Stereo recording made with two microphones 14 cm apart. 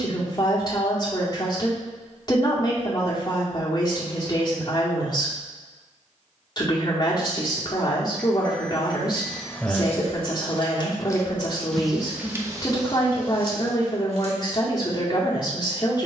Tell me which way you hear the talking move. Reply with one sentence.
You can hear the talking stay in one place.